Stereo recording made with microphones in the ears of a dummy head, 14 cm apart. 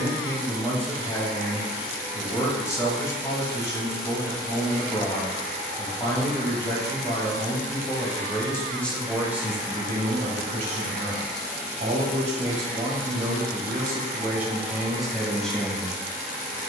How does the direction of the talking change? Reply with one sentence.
In this clip you hear the talking move from left to right and back again.